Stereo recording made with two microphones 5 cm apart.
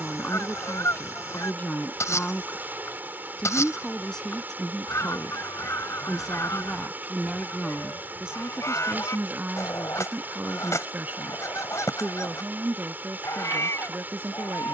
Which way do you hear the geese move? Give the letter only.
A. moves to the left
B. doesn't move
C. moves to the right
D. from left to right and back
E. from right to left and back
B.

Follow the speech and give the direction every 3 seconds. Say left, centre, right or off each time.
left, centre, centre, right, right.